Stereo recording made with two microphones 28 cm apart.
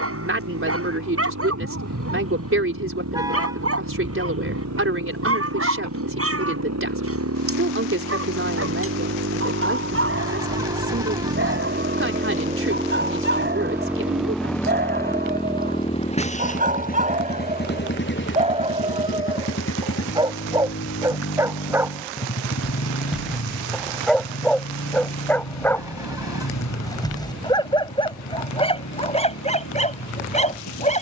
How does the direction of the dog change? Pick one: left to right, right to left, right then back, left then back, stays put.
right to left.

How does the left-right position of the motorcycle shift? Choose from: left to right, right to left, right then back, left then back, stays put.
right to left.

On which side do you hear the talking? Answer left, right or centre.
right.